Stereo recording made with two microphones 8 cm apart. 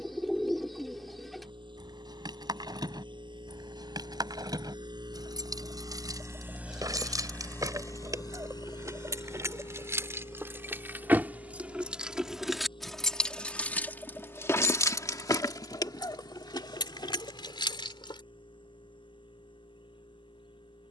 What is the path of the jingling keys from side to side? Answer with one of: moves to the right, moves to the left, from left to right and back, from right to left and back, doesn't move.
moves to the left.